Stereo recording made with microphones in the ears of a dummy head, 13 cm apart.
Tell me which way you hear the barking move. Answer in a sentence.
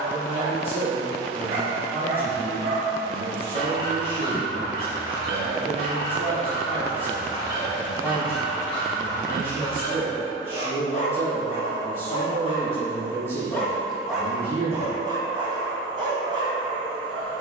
In this clip you hear the barking move from right to left and back again.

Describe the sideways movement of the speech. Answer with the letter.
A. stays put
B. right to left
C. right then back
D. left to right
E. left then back
A.